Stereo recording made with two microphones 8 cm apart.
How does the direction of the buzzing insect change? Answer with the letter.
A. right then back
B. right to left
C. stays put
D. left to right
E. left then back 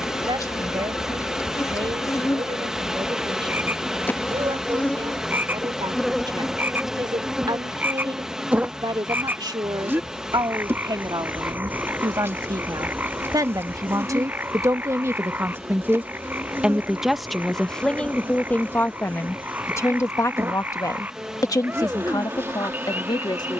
D.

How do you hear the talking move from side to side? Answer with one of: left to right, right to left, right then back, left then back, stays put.
right to left.